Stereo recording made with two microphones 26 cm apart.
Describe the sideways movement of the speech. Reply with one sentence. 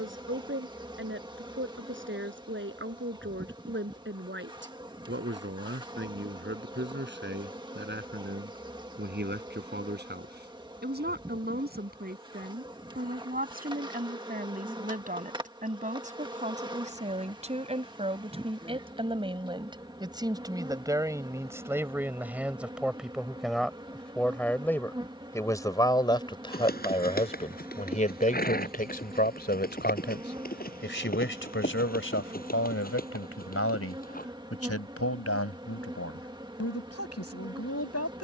You can hear the speech go from the right side to the left.